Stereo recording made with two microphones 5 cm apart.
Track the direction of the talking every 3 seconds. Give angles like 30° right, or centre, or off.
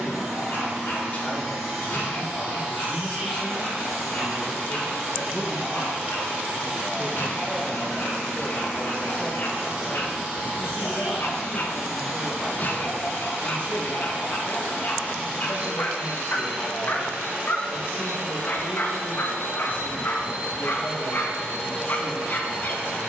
40° left, 10° left, centre, 50° left, 50° left, 50° left, 50° left, 50° left.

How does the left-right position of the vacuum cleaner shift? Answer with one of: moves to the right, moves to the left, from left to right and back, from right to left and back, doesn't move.
doesn't move.